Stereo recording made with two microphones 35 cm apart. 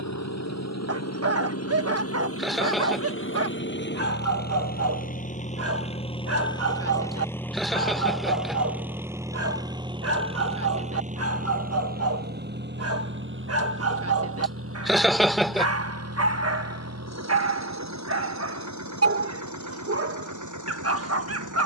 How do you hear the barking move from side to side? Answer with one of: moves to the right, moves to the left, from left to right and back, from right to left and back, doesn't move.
doesn't move.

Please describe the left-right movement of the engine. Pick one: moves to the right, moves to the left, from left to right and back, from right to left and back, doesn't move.
moves to the right.